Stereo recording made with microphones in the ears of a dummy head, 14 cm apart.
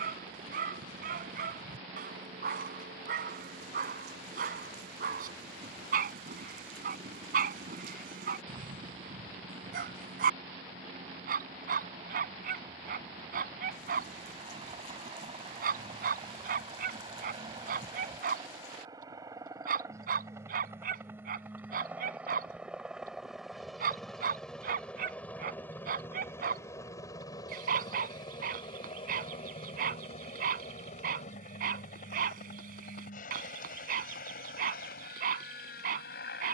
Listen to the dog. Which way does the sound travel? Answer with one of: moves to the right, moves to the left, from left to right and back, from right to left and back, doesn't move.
doesn't move.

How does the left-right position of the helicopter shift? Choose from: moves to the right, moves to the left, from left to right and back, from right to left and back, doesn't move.
moves to the left.